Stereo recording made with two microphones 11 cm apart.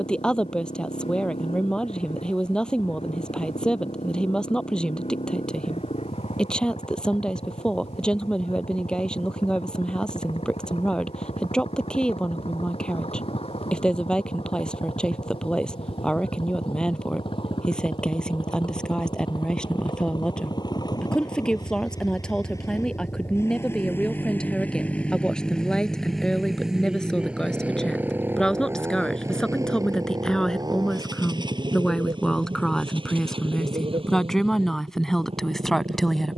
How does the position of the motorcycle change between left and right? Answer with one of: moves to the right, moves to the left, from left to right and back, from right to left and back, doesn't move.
moves to the right.